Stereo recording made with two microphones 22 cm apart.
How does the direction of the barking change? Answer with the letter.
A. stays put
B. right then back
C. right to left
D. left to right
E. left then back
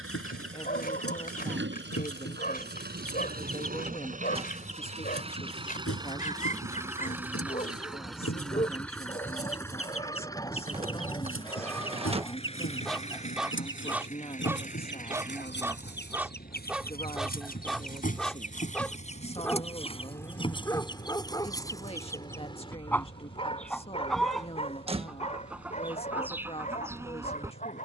B.